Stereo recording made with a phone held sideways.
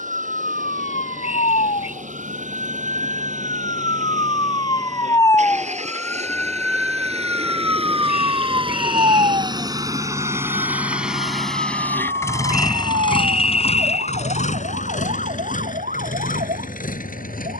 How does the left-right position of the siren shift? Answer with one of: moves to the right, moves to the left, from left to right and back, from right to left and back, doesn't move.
moves to the right.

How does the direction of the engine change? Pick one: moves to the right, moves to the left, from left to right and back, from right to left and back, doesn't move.
moves to the left.